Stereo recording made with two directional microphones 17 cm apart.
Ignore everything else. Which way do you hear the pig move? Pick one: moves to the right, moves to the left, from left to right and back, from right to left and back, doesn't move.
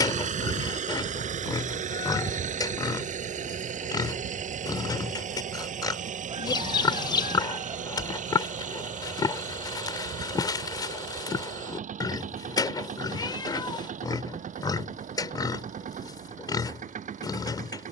doesn't move.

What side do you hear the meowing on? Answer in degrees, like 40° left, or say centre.
20° left.